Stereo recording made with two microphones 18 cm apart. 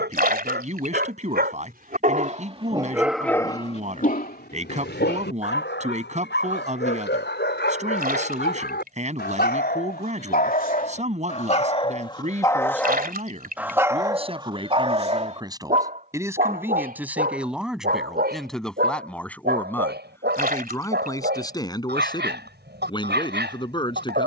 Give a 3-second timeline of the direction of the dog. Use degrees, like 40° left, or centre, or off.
50° right, 50° left, 70° left, 50° left, centre, 50° right, 60° right, 70° right.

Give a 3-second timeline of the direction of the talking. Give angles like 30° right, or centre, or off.
40° right, 40° right, 40° right, 40° right, 30° right, 10° right, 10° left, 20° left.